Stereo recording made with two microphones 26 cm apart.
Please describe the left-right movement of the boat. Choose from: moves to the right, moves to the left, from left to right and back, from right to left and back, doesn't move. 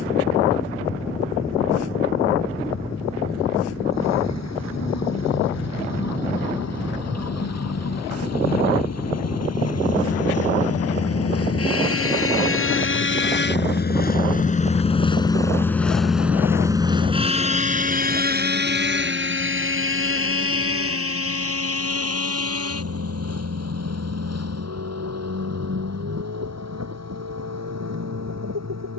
moves to the right.